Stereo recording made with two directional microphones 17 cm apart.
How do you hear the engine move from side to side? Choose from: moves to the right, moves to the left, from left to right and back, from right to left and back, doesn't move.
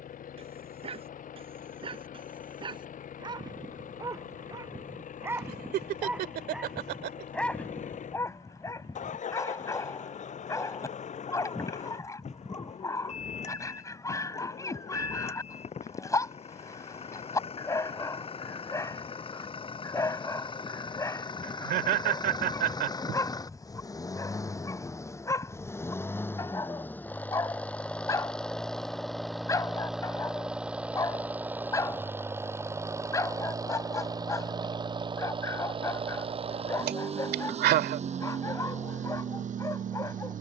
moves to the right.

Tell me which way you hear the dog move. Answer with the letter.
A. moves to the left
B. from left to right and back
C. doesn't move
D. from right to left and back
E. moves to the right
A.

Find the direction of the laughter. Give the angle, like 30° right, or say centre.
70° right.